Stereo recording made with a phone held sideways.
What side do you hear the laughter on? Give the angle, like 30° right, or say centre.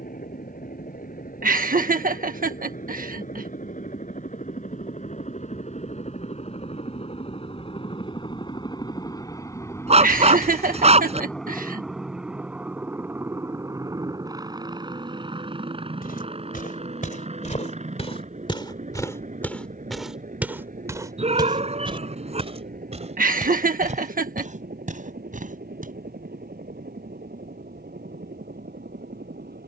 60° right.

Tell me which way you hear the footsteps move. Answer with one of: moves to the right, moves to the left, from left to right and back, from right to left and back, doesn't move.
moves to the right.